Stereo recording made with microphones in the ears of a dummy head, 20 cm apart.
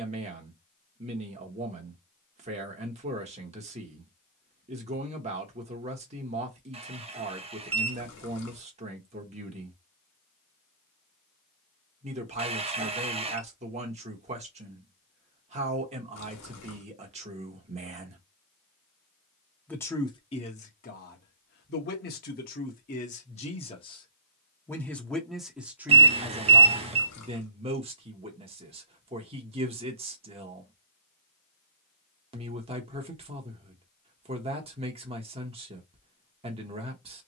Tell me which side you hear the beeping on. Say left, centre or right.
right.